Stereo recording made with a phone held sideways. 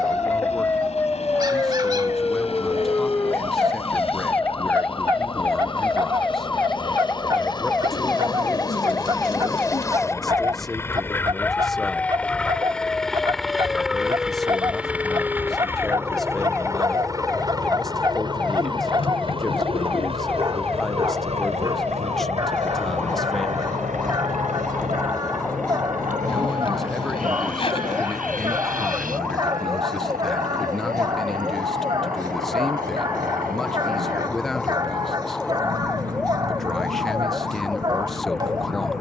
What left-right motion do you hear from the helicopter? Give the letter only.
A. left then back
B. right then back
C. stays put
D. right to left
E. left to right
E.